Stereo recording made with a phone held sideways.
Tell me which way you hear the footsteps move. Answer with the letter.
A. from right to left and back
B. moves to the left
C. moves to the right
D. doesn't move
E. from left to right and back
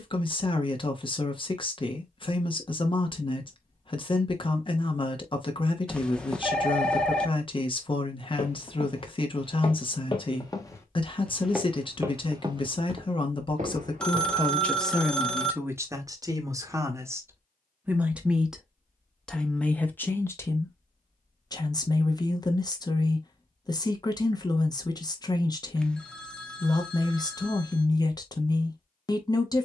C.